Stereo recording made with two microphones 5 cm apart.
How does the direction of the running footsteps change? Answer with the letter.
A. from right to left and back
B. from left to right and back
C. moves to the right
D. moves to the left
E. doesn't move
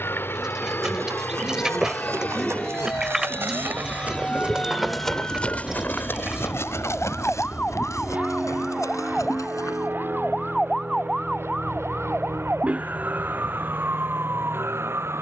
D.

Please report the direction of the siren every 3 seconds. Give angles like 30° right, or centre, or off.
40° left, 40° left, 20° left, centre, 30° right.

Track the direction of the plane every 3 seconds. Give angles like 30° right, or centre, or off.
30° left, 10° left, 20° right, 40° right, 50° right.